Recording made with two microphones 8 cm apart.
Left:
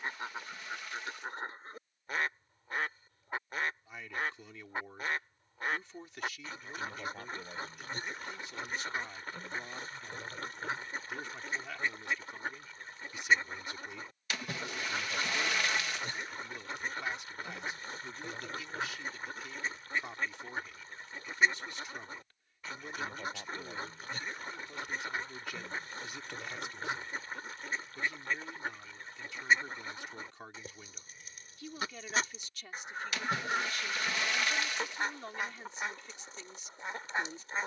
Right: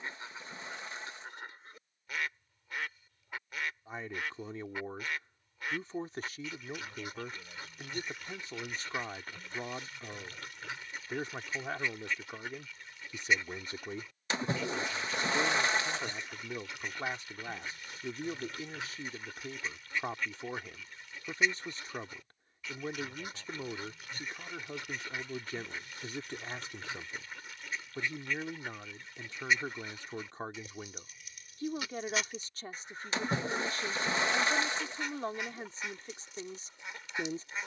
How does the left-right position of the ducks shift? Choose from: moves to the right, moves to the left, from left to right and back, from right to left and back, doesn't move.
doesn't move.